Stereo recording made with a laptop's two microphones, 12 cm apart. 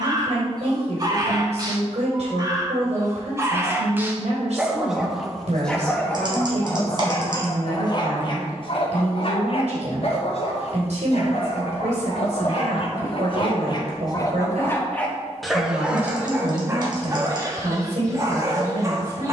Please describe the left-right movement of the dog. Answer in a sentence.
You can hear the dog go left and come back.